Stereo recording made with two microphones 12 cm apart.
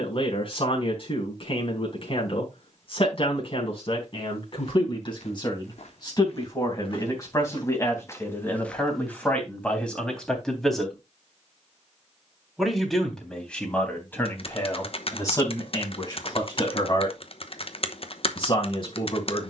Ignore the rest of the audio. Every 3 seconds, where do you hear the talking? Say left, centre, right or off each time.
left, left, left, centre, centre, left, left.